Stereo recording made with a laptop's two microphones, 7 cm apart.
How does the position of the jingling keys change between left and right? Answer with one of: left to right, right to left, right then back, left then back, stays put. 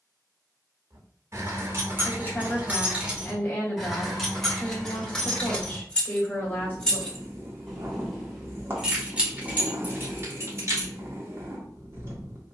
left then back.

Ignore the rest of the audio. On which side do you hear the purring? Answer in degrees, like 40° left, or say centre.
30° right.